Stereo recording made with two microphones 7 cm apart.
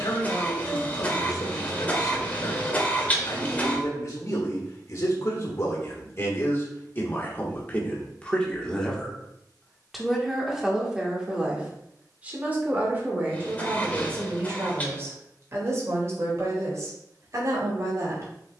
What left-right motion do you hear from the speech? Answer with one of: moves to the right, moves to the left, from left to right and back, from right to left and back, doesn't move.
moves to the right.